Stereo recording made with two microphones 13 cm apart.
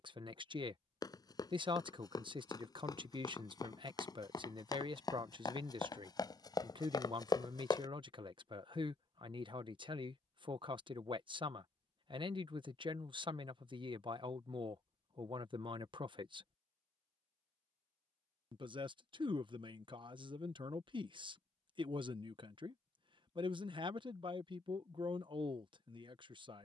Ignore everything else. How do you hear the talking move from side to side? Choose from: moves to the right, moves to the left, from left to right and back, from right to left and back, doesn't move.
doesn't move.